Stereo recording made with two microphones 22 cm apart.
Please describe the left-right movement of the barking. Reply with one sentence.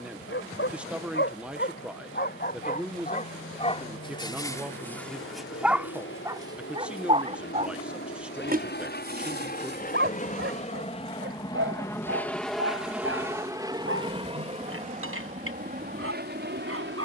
You can hear the barking move from left to right.